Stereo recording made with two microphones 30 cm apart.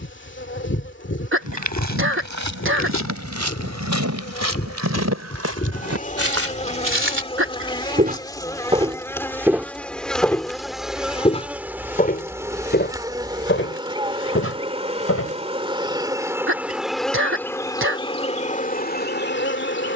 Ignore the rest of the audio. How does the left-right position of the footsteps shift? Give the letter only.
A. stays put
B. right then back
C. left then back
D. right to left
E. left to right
D.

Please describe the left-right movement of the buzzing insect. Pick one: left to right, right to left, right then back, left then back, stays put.
right then back.